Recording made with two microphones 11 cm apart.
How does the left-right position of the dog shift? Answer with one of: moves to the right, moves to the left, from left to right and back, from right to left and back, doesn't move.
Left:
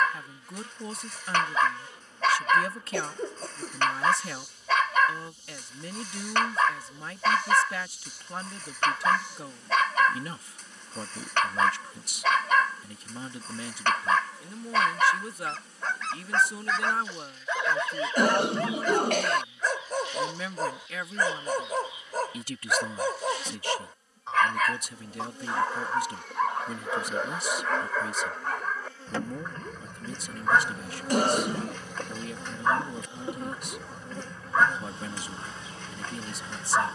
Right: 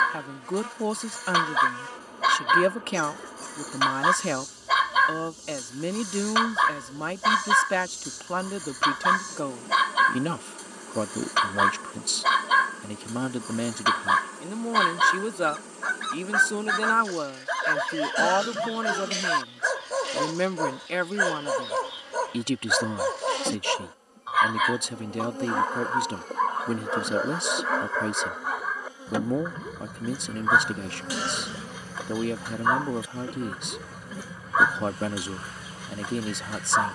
doesn't move.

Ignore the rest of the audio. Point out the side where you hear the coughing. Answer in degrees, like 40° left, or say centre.
50° left.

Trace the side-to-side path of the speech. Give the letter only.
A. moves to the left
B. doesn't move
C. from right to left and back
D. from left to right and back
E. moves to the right
B.